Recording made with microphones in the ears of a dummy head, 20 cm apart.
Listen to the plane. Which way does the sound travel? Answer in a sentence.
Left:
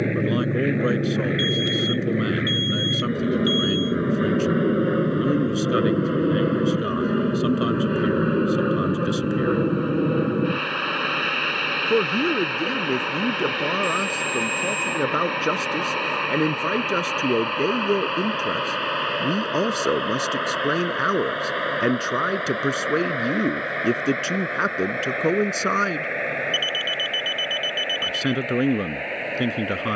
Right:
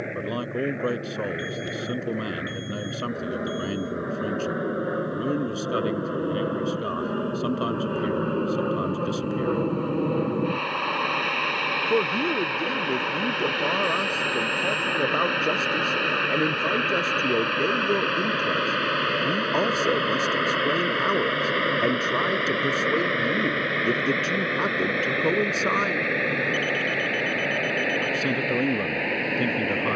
In this clip you hear the plane travel towards the right.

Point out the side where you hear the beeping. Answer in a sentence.
You can hear the beeping on the left.